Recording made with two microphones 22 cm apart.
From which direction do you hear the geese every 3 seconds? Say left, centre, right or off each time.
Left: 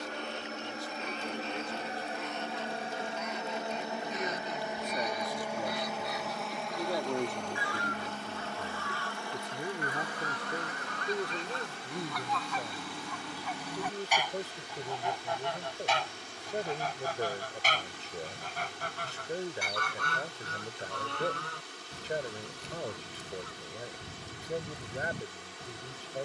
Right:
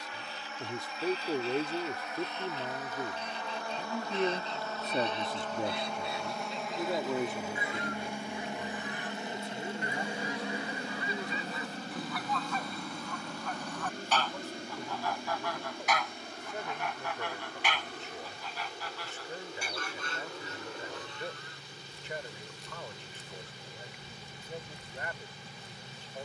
right, right, right, centre, centre, left, left, left, left.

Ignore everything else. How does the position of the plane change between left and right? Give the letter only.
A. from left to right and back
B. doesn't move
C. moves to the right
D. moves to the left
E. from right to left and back
C.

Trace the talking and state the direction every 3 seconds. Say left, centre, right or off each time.
right, right, centre, left, left, left, left, left, left.